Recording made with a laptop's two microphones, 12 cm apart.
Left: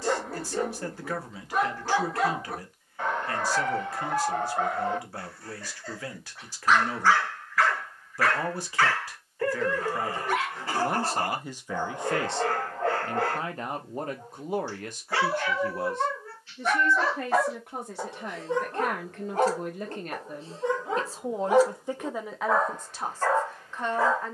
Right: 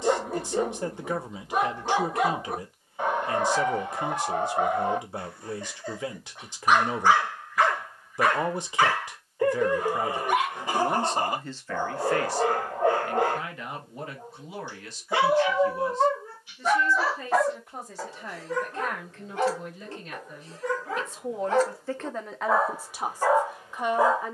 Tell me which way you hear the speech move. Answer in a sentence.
In this clip you hear the speech move from right to left and back again.